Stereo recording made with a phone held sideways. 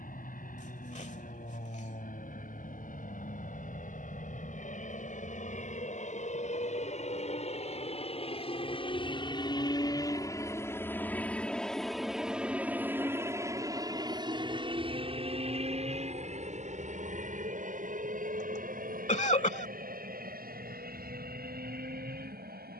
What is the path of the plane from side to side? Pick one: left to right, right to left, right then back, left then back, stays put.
left to right.